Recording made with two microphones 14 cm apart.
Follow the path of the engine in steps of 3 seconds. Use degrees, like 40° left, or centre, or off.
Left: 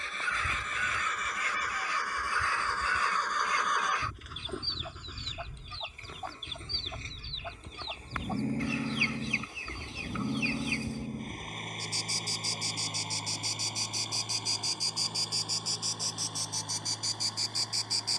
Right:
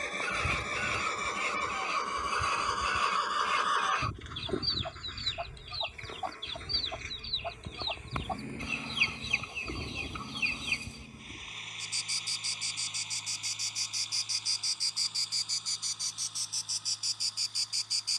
30° right, centre, 30° left, 50° left, 60° left, 60° left.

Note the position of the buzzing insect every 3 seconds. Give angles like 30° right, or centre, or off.
20° right, 20° right, 20° right, centre, 30° left, centre.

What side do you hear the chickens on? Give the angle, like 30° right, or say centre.
20° right.